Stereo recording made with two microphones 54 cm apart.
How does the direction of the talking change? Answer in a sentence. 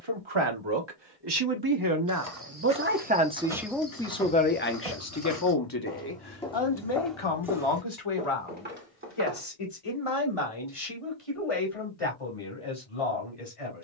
In this clip you hear the talking go from the right side to the left.